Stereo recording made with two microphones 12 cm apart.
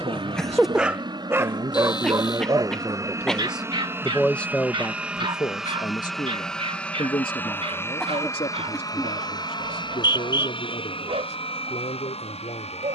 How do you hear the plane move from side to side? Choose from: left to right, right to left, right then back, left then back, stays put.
right to left.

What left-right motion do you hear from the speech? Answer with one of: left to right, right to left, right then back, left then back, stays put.
right to left.